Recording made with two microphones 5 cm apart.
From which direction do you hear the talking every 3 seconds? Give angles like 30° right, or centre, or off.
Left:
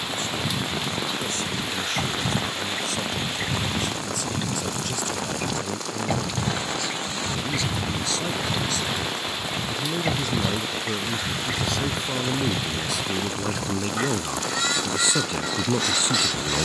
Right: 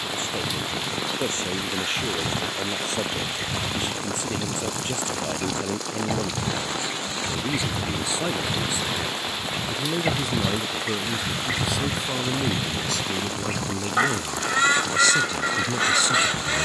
30° right, 30° right, 20° right, 10° right, 10° left, 30° left.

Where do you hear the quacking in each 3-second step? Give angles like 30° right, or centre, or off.
30° left, 20° left, 10° left, 10° right, 30° right, 30° right.